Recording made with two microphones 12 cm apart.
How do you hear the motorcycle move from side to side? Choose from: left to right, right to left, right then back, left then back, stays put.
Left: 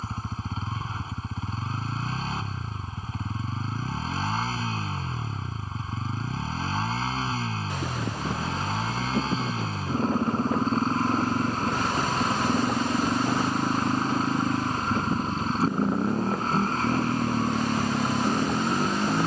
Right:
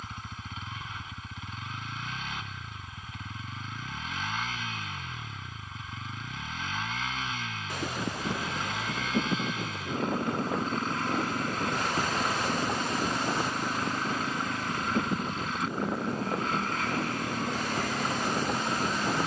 stays put.